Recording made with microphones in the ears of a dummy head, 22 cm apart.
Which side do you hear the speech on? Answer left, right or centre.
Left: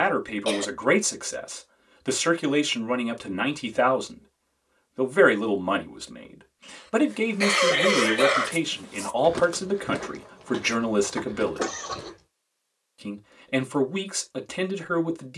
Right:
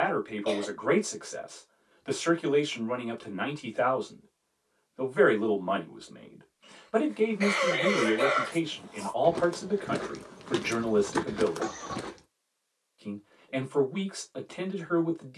left.